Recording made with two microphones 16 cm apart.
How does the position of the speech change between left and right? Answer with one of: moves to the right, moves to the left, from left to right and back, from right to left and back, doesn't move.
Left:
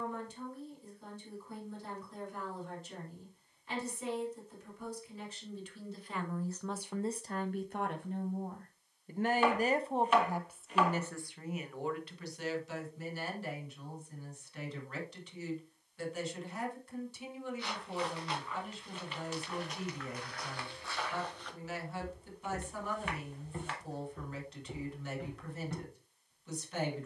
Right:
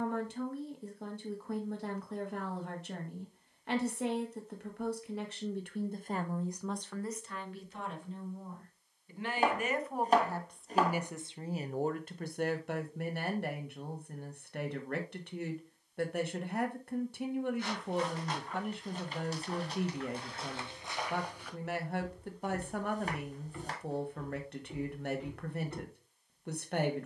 from right to left and back.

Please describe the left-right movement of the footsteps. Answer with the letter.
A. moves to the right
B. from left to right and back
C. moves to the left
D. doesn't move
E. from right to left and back
C.